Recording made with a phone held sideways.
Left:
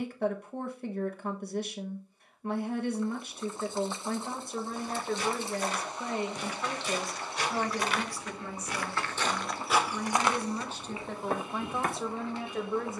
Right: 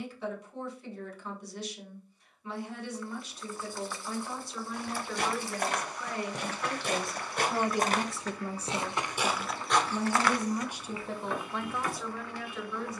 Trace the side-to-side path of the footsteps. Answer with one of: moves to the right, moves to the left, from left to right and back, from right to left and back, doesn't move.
moves to the left.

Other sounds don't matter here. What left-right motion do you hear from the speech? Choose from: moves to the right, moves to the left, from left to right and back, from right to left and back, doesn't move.
from left to right and back.